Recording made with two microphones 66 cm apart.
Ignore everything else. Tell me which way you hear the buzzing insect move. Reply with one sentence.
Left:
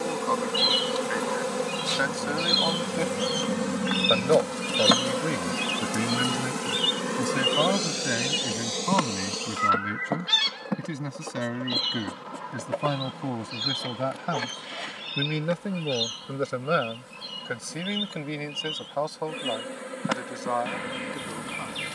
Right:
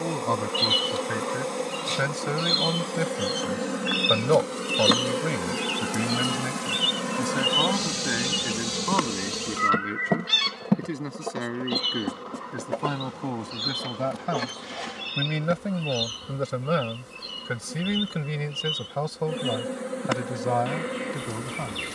You can hear the buzzing insect travel towards the right.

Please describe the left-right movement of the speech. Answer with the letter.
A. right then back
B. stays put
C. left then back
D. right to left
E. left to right
C.